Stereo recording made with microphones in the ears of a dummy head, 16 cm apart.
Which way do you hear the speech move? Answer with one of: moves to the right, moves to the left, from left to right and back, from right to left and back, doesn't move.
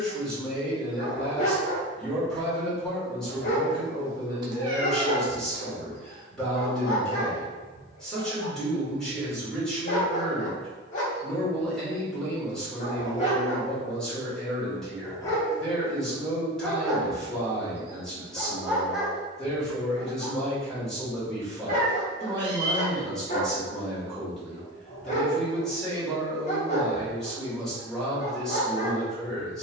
doesn't move.